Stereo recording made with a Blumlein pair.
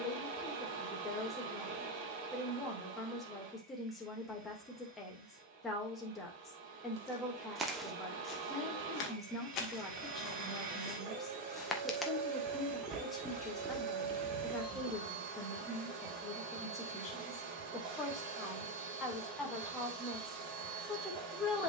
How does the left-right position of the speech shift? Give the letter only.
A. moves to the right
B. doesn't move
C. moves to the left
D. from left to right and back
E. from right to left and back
B.